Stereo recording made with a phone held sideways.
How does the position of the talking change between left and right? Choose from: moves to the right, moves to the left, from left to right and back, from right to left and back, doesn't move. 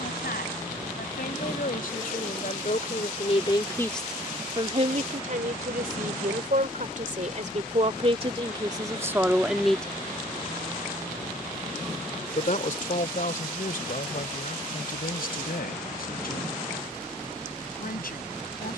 from left to right and back.